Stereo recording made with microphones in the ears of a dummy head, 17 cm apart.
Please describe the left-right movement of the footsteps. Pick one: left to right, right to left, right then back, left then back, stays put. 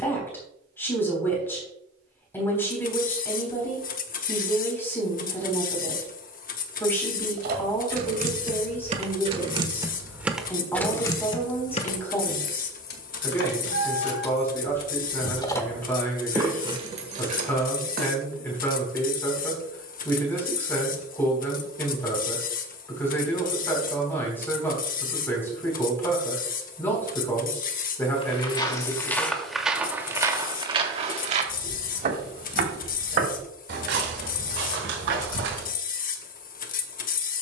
left to right.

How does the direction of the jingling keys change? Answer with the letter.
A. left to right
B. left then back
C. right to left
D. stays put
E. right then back
B.